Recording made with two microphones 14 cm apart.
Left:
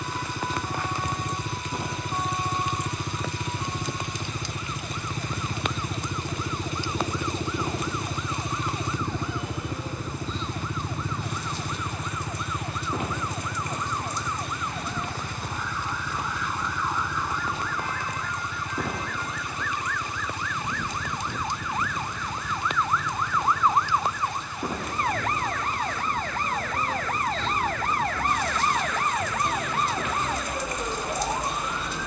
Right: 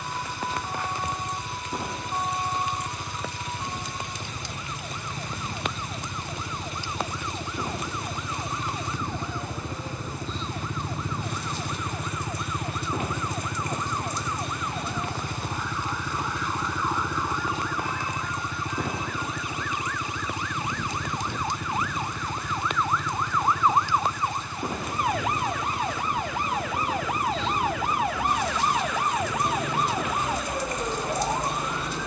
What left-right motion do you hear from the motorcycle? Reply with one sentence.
In this clip you hear the motorcycle travel towards the right.